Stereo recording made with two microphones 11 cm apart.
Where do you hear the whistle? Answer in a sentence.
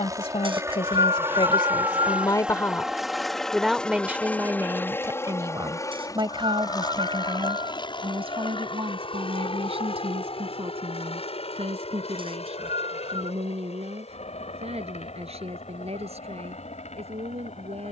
You can hear the whistle on the right.